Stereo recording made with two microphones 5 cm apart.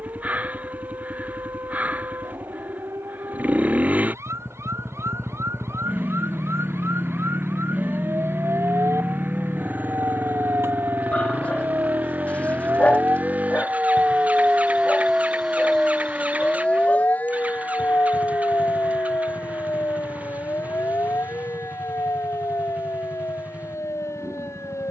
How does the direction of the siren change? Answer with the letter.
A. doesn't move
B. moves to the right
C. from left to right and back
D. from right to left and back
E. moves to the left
E.